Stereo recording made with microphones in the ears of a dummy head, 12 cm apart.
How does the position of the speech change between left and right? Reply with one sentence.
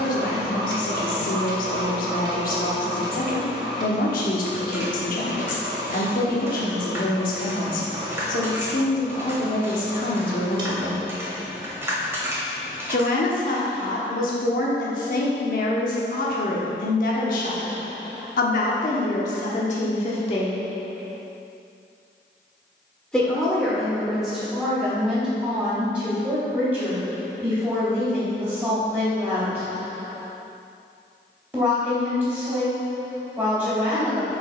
You can hear the speech go from the left side to the right.